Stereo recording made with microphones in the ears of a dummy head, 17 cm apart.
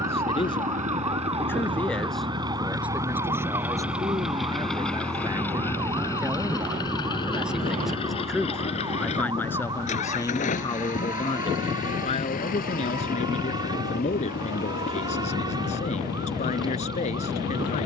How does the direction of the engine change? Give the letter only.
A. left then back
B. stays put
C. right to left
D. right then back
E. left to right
C.